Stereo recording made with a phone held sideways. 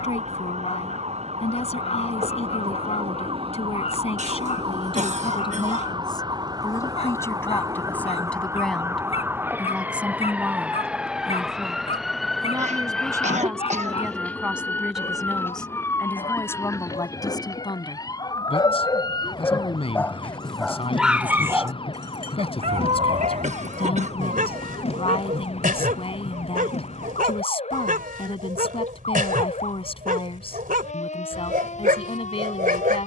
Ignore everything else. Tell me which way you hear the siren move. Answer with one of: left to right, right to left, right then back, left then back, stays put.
right to left.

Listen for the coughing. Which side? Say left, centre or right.
right.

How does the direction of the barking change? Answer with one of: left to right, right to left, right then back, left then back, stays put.
left to right.